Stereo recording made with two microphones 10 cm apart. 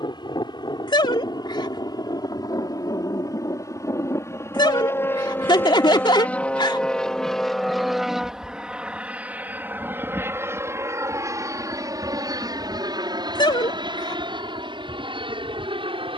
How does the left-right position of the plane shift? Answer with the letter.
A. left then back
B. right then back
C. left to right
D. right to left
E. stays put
C.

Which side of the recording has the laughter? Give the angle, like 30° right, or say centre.
50° left.